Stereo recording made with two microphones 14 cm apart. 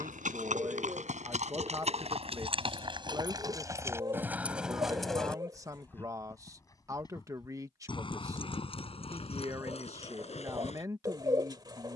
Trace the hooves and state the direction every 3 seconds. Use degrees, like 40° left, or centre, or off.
50° right, 10° right, 30° left, 50° left.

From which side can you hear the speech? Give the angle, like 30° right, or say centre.
20° right.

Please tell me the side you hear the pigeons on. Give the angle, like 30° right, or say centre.
30° right.